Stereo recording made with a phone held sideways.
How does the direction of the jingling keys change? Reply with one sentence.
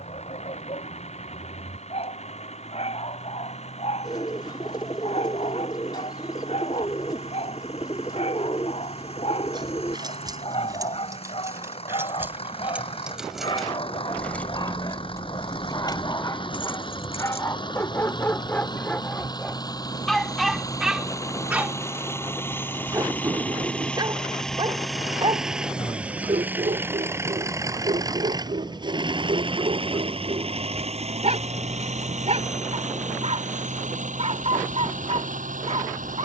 In this clip you hear the jingling keys move to the left.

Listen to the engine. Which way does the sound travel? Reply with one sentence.
You can hear the engine go from the left side to the right.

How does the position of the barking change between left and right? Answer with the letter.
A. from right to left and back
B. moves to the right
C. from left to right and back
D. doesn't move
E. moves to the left
B.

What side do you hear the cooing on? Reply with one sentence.
You can hear the cooing on the left.